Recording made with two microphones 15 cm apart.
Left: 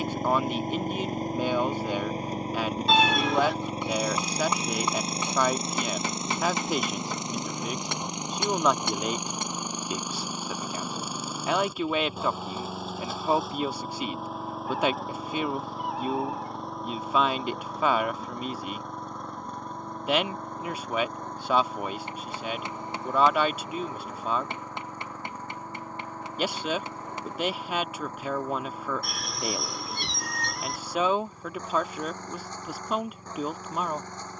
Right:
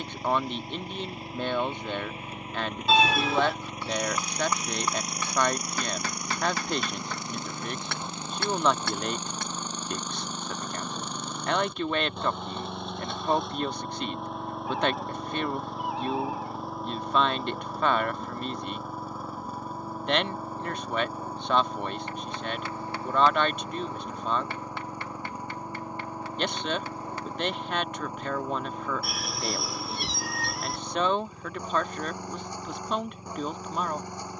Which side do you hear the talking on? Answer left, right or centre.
centre.